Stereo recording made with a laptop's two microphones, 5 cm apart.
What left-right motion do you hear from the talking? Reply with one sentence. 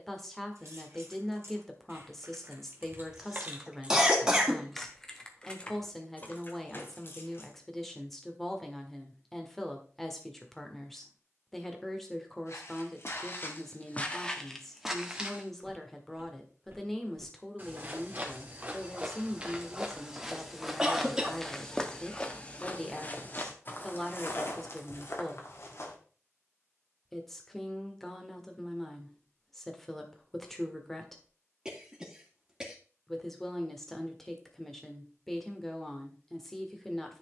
In this clip you hear the talking stay in one place.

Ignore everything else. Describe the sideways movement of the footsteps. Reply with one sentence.
In this clip you hear the footsteps go right and come back.